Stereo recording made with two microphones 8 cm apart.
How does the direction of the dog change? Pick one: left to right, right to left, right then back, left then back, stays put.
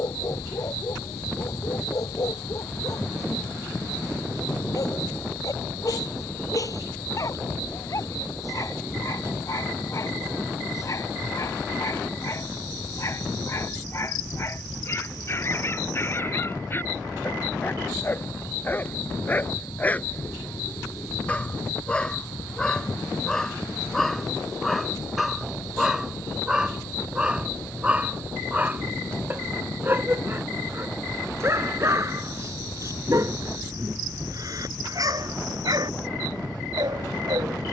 left to right.